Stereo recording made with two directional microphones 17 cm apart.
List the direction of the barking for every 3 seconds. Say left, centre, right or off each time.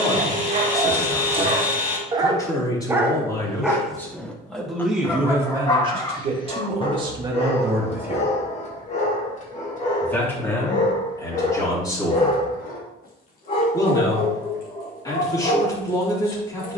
right, centre, left, left, left, left.